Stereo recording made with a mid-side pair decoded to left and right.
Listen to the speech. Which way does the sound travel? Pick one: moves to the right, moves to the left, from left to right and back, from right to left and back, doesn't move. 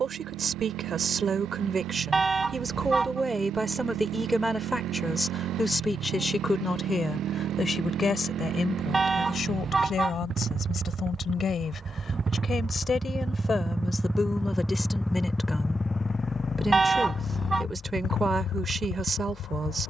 from right to left and back.